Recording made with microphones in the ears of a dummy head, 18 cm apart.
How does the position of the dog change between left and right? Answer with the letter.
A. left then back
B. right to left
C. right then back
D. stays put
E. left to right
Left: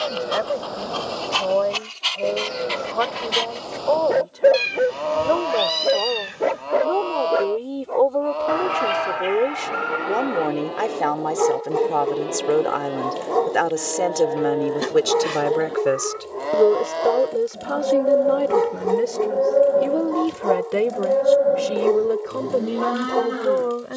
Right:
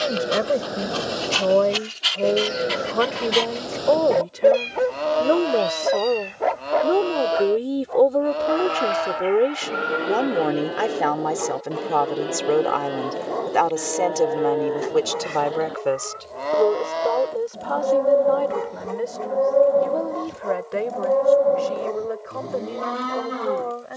B.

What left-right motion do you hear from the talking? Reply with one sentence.
In this clip you hear the talking move to the left.